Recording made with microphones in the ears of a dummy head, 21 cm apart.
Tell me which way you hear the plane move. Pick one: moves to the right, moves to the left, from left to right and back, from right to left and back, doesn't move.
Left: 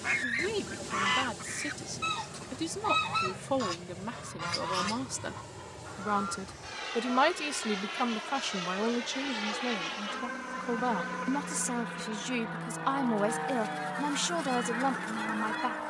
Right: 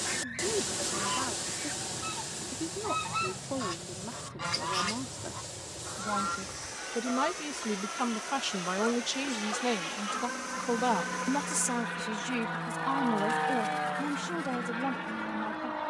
moves to the right.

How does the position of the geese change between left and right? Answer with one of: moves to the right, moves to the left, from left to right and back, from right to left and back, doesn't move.
from left to right and back.